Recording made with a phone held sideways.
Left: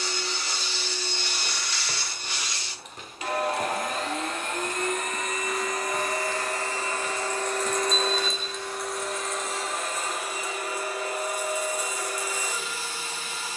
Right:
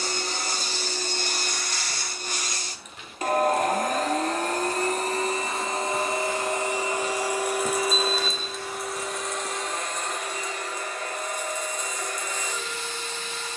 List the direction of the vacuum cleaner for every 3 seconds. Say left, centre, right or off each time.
right, right, centre, centre, centre.